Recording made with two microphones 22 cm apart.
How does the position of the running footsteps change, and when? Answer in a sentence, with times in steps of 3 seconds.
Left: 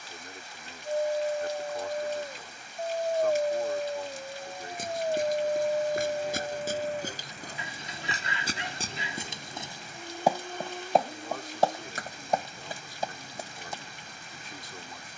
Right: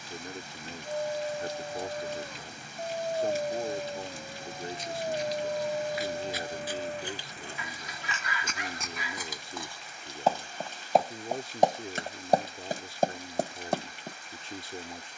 In this clip you hear the running footsteps not at all from 0 s, on the left from 3 s, in the centre from 9 s and on the right from 12 s.